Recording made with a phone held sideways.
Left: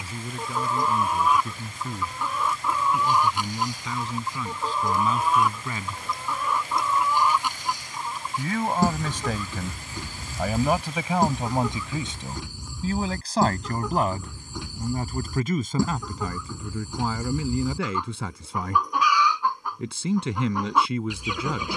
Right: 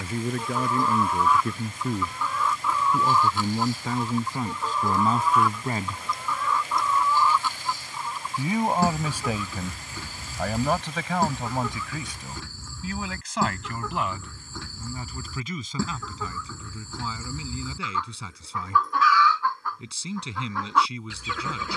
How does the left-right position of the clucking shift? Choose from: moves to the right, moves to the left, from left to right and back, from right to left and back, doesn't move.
doesn't move.